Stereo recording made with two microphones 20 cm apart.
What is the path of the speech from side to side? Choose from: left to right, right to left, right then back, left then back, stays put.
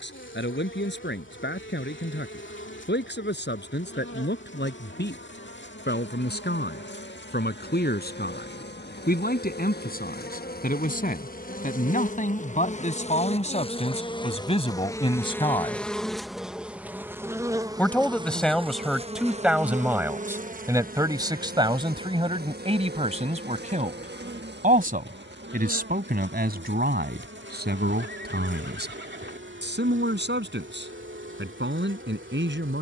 left to right.